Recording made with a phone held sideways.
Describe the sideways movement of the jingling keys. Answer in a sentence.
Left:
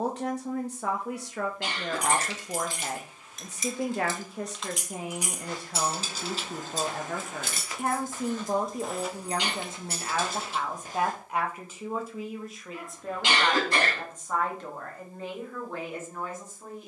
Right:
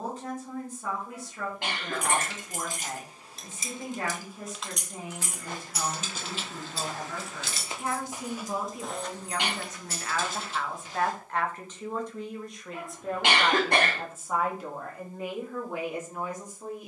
You can hear the jingling keys travel towards the left.